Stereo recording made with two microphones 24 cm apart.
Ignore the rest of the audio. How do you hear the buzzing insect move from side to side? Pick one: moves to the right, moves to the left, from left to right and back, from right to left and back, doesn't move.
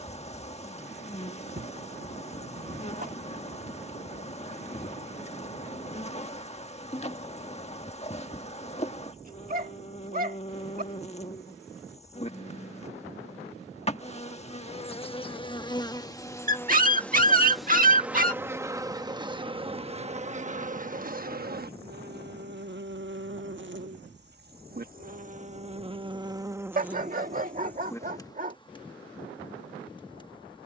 from left to right and back.